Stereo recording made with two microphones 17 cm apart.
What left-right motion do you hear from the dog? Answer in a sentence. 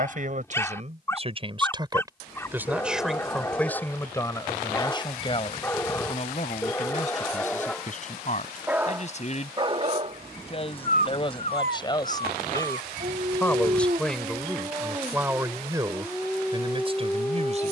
In this clip you hear the dog move from left to right and back again.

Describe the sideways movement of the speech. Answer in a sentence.
You can hear the speech move from right to left and back again.